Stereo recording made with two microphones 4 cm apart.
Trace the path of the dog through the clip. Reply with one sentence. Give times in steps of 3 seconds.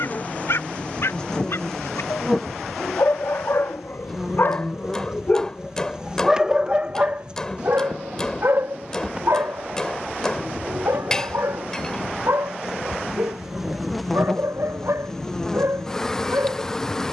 You can hear the dog on the left from 0 s and on the right from 6 s.